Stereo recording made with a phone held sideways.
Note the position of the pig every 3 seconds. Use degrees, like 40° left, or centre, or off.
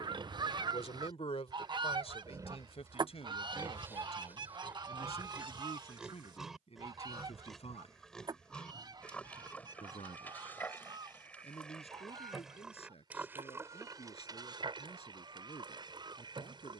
20° right, 10° right, centre, 10° left, 20° right, 30° right.